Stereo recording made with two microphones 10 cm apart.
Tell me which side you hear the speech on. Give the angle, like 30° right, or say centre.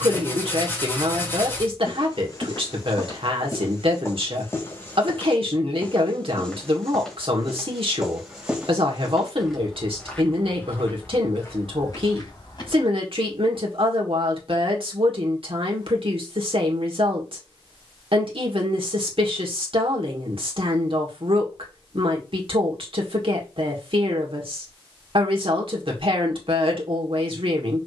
70° right.